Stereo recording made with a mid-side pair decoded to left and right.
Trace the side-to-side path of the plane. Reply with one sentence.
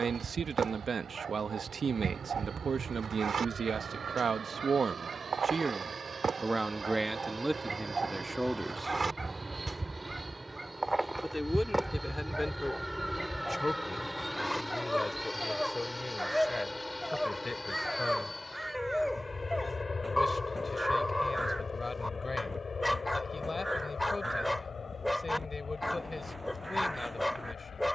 In this clip you hear the plane move from right to left.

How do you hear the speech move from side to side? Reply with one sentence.
You can hear the speech move from right to left.